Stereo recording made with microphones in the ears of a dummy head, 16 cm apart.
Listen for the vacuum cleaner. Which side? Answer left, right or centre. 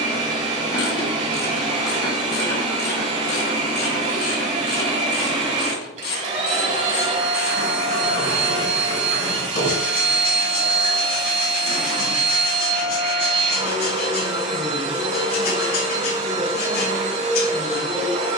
right.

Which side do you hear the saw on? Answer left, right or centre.
left.